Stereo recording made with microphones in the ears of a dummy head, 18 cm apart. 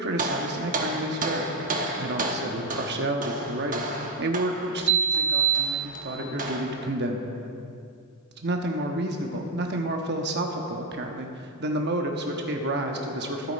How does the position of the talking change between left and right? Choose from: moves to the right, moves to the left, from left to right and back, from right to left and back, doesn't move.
doesn't move.